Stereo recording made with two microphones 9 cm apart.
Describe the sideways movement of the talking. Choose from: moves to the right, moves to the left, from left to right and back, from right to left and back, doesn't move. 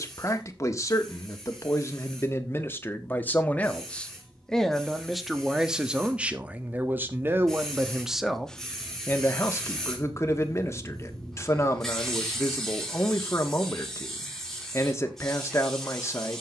from left to right and back.